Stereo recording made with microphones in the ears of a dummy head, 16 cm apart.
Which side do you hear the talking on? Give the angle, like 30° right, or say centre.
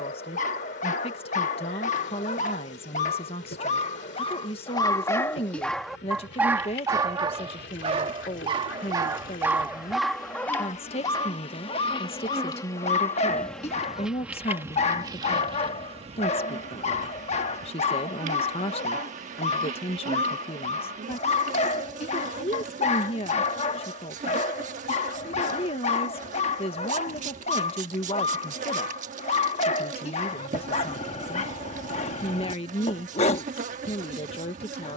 30° left.